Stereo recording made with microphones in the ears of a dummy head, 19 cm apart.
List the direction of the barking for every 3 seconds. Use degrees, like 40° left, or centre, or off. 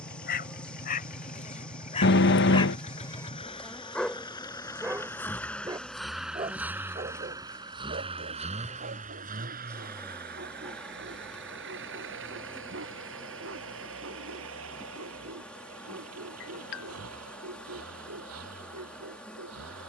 30° left, centre, 40° right, 50° right, 60° right, 70° right, 70° right.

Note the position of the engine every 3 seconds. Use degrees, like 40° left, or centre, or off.
40° left, 20° left, 20° right, 50° right, 70° right, 80° right, 80° right.